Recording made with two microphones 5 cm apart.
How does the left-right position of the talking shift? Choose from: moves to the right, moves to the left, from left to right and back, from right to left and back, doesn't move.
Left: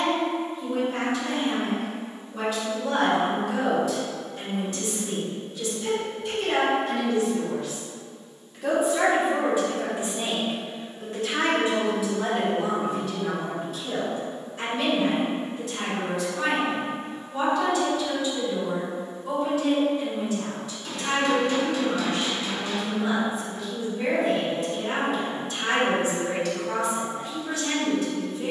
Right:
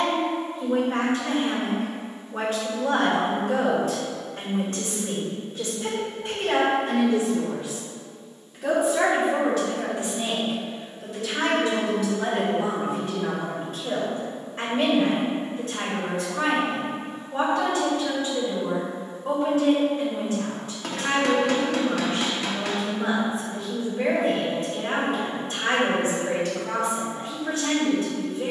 from right to left and back.